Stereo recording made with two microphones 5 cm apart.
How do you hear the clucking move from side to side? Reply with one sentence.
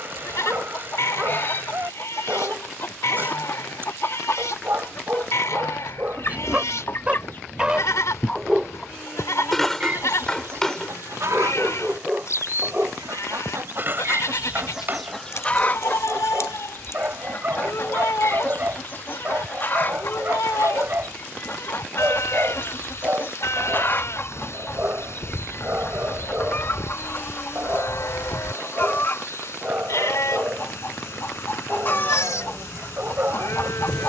In this clip you hear the clucking move from left to right and back again.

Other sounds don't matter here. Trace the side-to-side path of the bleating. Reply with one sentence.
In this clip you hear the bleating stay put.